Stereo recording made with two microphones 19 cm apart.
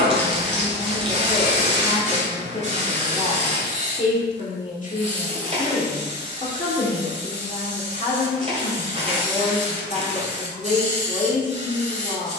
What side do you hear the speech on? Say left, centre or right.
left.